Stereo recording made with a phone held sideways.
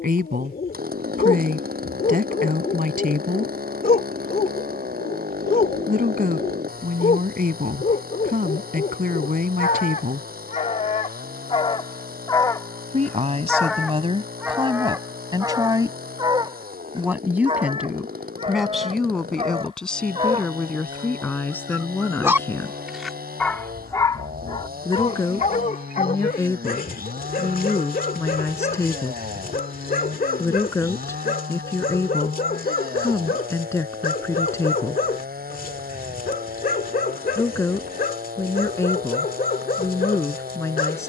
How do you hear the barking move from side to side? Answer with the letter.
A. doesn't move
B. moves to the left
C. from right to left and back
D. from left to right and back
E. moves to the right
D.